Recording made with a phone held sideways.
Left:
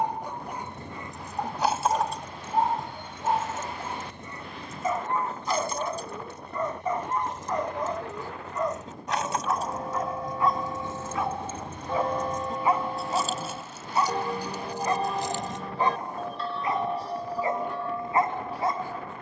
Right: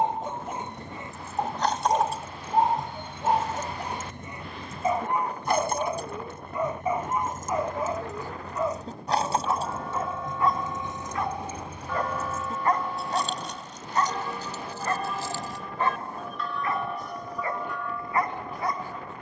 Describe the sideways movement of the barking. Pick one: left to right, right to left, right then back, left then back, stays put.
right to left.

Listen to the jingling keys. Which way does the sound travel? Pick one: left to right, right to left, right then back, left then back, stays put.
right then back.